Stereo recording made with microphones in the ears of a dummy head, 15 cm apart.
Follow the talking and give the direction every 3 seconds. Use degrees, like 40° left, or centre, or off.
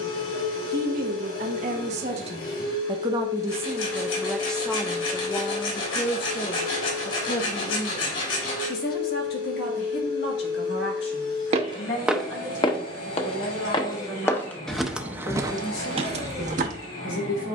40° right, centre, 50° left, 60° left, 70° left, 70° left.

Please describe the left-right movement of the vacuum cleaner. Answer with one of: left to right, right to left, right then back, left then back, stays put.
stays put.